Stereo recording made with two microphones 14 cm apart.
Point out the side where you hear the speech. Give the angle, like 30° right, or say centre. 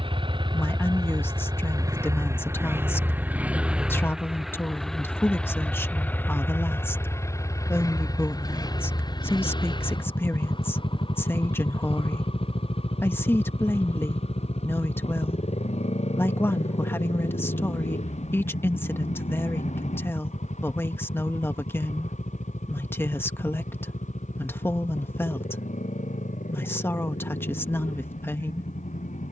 20° left.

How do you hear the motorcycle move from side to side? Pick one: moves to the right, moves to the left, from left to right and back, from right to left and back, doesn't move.
moves to the left.